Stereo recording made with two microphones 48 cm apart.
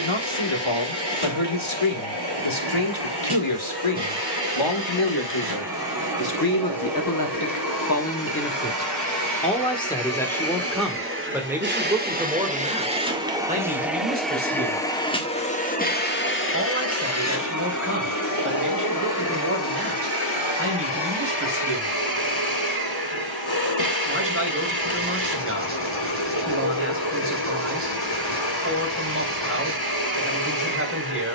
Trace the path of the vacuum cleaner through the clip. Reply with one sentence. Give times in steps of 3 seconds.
You can hear the vacuum cleaner on the right from 0 s, in the centre from 12 s and on the left from 15 s.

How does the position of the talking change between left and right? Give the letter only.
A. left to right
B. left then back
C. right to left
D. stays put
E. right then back
A.